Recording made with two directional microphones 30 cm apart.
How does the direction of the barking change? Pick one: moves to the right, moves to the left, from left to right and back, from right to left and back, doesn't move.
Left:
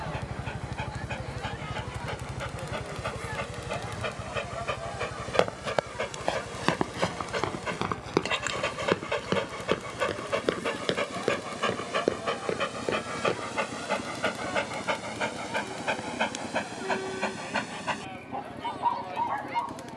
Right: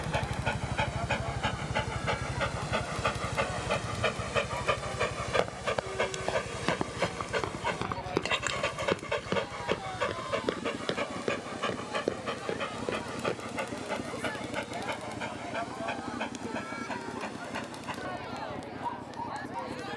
moves to the left.